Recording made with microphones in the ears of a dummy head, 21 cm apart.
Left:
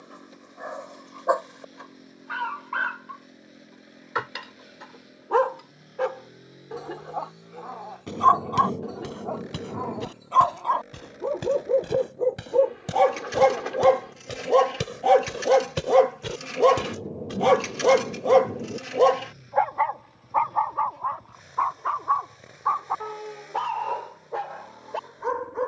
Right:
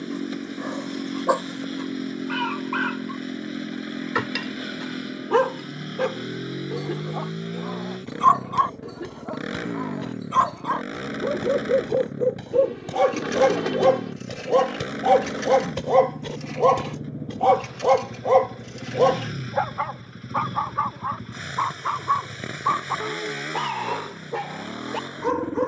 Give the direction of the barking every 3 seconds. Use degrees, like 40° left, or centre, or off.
50° right, 40° right, 40° right, 30° right, 10° right, 20° left, centre, 40° right, 40° right.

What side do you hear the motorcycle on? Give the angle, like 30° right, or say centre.
90° right.